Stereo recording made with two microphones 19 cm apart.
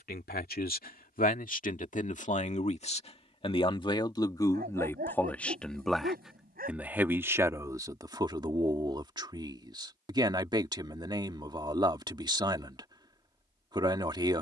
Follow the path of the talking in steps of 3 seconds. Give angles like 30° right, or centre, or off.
40° left, 20° left, 10° right, 20° right, 20° right.